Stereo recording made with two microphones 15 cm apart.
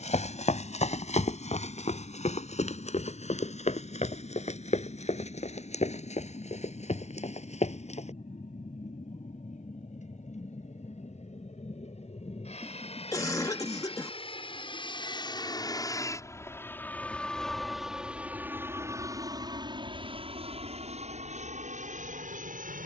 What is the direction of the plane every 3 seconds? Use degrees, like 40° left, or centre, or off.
70° left, 70° left, 60° left, 60° left, 40° left, 20° left, 30° right, 50° right.